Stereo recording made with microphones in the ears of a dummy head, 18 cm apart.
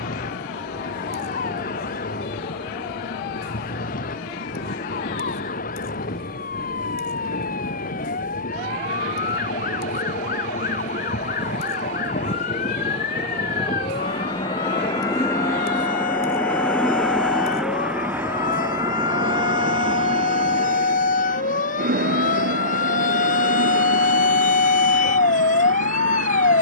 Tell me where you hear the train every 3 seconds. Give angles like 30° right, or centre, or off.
60° left, 50° left, 50° left, 40° left, 30° left, 10° left, 30° right, 50° right, 70° right.